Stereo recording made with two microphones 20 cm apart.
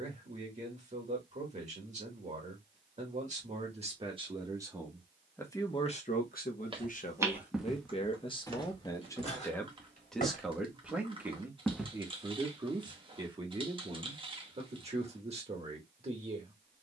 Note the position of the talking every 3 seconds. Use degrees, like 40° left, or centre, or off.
30° right, 10° right, 30° left, centre, 20° right, 30° right.